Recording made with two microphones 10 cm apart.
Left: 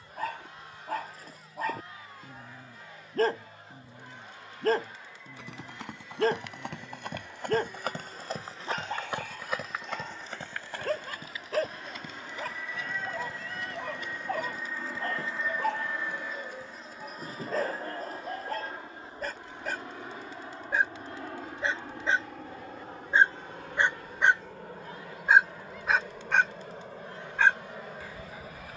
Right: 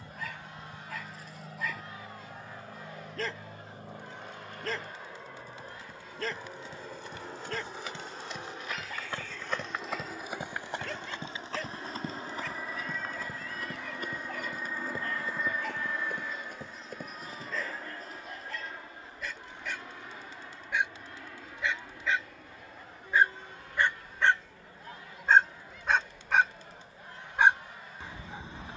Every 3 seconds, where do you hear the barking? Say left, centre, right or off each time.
left, left, left, left, left, left, left, left, centre, right.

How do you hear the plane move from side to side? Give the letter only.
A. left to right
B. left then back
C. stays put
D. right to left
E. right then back
D.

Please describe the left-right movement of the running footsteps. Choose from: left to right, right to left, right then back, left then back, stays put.
left to right.